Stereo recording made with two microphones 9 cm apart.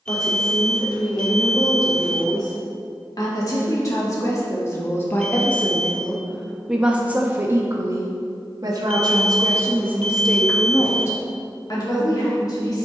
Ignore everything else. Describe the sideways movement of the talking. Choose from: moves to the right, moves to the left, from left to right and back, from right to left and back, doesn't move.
from left to right and back.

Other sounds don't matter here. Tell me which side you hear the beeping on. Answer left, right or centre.
centre.